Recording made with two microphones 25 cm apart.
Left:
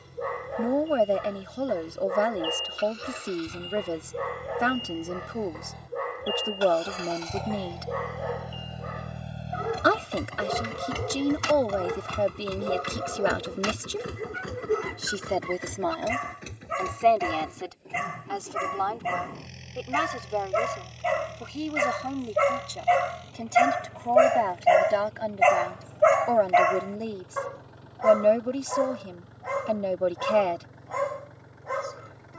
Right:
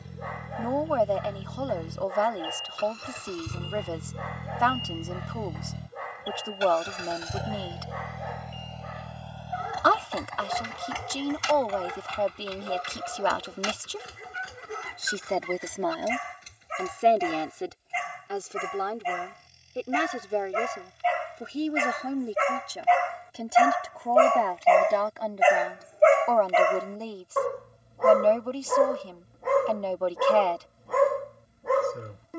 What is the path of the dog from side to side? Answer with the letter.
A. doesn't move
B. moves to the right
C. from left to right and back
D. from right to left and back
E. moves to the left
B.